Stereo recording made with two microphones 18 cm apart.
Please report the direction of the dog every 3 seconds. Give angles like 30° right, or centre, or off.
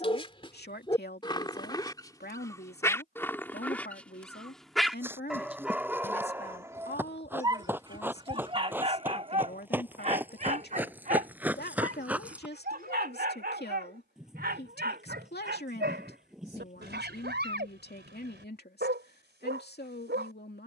20° left, centre, 20° right, 40° right, 60° right, 70° right, 70° right.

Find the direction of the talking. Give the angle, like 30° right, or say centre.
60° left.